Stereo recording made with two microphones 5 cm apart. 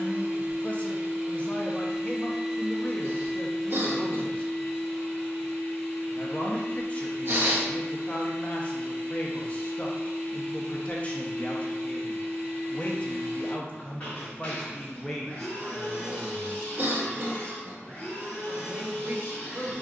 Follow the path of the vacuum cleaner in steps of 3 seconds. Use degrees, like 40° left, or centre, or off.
20° right, 10° left, 20° left, 20° left, 20° left, 20° left, 20° left.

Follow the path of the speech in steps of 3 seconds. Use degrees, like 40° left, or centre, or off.
30° left, 30° left, 30° left, 30° left, 30° left, centre, 40° right.